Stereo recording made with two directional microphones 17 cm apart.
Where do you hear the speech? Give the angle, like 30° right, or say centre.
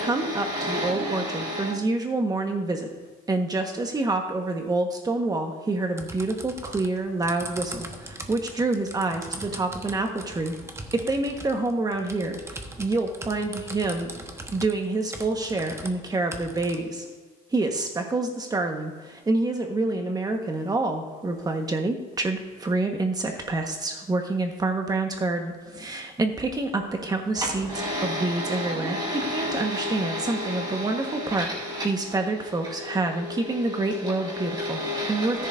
20° right.